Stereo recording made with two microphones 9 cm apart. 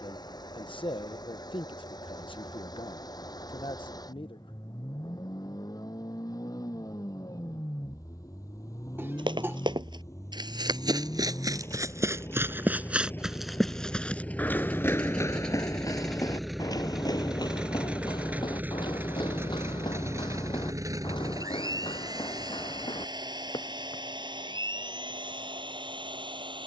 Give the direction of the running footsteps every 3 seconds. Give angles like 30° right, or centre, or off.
off, off, off, 50° right, centre, 40° left, 60° left, 70° left, off.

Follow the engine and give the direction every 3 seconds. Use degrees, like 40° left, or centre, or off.
50° left, 50° left, 40° left, 40° left, 20° left, centre, 30° right, 50° right, 70° right.